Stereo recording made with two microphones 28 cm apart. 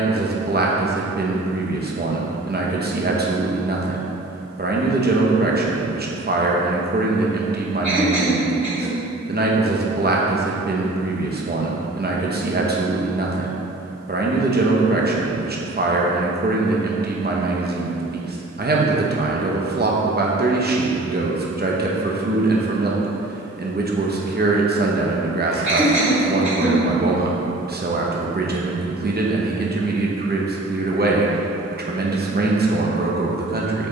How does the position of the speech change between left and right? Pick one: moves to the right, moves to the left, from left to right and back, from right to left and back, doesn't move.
doesn't move.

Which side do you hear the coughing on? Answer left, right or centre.
right.